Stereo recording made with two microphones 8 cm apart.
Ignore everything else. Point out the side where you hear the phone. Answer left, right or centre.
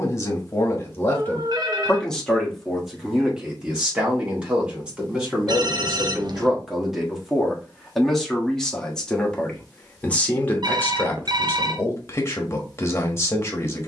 right.